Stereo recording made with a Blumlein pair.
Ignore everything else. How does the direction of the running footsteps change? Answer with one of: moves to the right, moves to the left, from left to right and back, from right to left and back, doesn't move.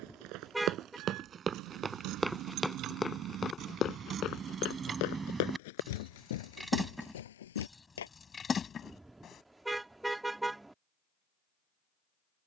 moves to the left.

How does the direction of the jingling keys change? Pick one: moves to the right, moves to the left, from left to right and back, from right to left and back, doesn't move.
moves to the left.